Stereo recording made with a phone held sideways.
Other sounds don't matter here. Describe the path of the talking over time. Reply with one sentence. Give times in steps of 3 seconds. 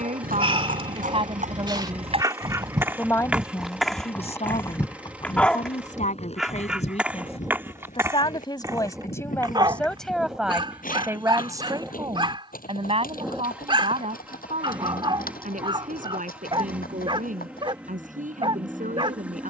You can hear the talking on the right from 0 s, on the left from 3 s, in the centre from 9 s and on the right from 12 s.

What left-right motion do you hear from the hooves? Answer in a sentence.
In this clip you hear the hooves move from right to left.